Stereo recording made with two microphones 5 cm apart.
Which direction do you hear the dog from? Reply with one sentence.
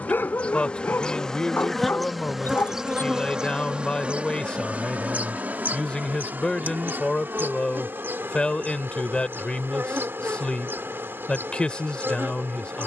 In this clip you hear the dog on the left.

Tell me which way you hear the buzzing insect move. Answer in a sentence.
You can hear the buzzing insect go from the left side to the right.